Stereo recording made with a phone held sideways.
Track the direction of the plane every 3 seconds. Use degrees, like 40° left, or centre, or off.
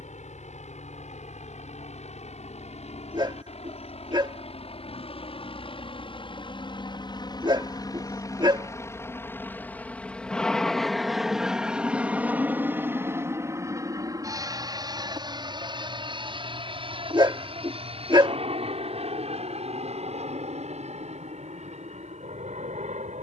60° left, 50° left, 30° left, centre, 20° right, 40° right, 50° right, 50° right.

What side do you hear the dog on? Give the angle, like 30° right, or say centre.
30° right.